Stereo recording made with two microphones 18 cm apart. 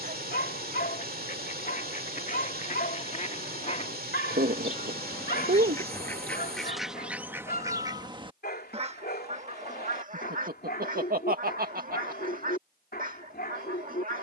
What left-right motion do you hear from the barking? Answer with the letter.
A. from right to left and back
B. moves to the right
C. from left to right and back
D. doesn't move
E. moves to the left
D.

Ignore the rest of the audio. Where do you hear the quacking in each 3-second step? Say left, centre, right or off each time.
left, left, centre, right, right.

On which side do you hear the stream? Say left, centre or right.
right.